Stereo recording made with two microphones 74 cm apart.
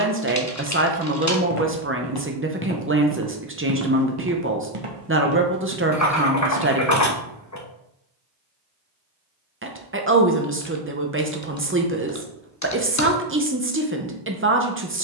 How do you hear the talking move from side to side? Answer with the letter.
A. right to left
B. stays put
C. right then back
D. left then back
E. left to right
B.